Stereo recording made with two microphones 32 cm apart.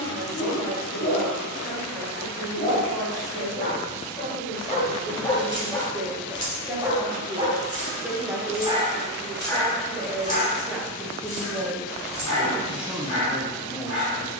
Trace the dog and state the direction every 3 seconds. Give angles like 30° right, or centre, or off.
50° left, 20° left, 20° right, 20° left, 50° left.